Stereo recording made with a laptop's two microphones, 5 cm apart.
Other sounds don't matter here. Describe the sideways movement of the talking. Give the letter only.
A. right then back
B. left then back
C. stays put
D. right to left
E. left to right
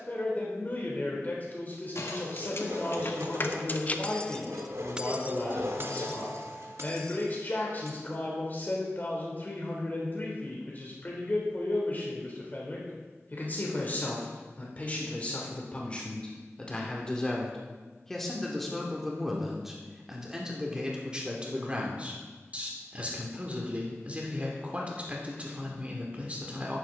E.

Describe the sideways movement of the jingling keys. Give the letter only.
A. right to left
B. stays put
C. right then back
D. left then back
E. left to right
E.